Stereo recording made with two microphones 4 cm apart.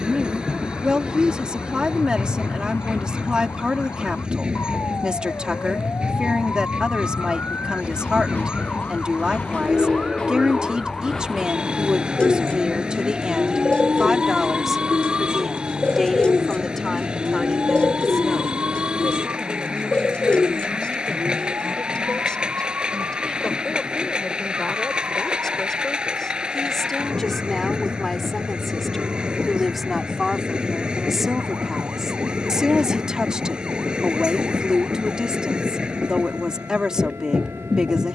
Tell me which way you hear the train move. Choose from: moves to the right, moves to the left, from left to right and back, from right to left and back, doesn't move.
doesn't move.